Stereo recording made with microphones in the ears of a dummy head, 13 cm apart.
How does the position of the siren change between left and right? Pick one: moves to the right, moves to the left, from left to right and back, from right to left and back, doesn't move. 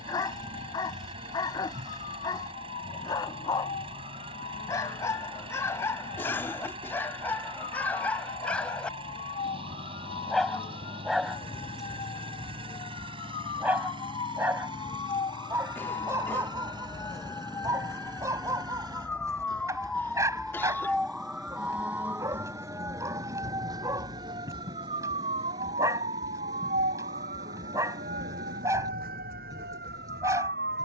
moves to the right.